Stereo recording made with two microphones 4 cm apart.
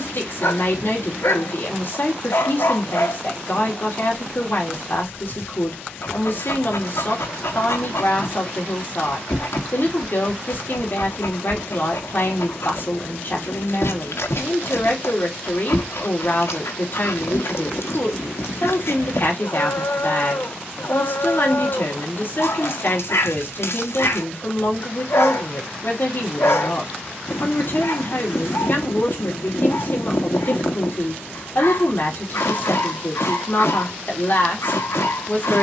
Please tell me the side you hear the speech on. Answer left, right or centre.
left.